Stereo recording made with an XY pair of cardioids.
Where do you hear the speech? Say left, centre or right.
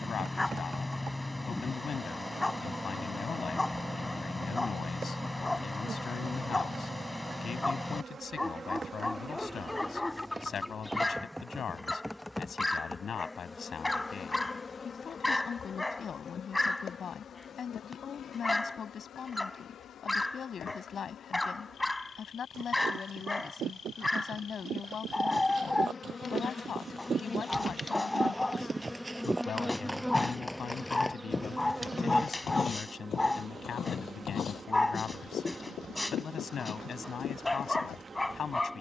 left.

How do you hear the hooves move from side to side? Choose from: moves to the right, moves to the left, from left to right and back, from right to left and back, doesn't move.
moves to the left.